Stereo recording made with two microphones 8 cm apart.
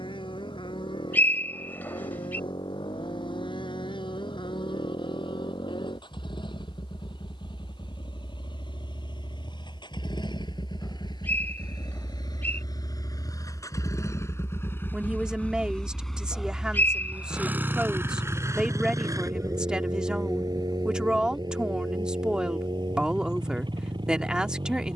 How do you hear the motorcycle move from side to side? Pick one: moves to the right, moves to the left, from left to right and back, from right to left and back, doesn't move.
moves to the right.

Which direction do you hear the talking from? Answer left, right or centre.
centre.